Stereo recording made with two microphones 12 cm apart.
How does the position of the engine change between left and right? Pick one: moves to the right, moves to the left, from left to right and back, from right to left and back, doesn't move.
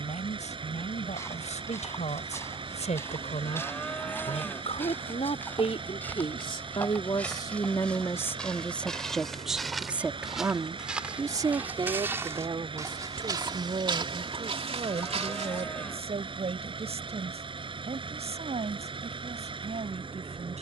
doesn't move.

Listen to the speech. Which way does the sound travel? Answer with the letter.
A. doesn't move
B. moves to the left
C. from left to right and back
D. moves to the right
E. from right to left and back
D.